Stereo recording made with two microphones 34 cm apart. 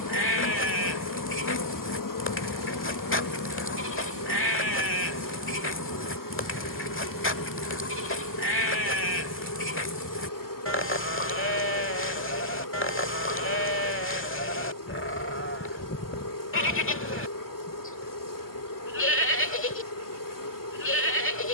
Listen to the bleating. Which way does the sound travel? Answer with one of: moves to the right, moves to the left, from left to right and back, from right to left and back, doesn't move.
doesn't move.